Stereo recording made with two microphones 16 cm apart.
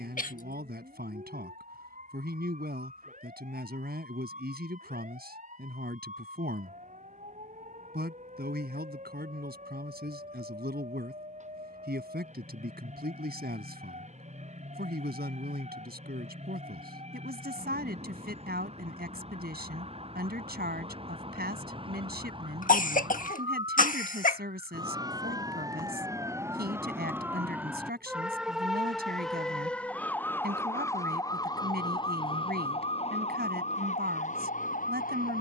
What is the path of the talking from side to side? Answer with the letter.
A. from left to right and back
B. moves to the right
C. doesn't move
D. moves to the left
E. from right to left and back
C.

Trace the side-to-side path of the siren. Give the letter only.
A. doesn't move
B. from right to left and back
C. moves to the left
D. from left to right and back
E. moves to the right
C.